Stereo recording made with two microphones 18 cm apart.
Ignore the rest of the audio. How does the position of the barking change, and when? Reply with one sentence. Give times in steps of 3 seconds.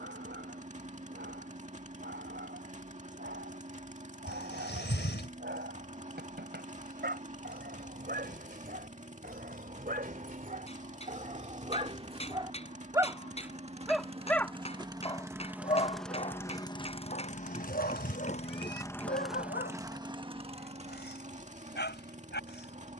In this clip you hear the barking on the right from 0 s, in the centre from 12 s and on the left from 15 s.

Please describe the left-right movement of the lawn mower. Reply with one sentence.
You can hear the lawn mower move from right to left and back again.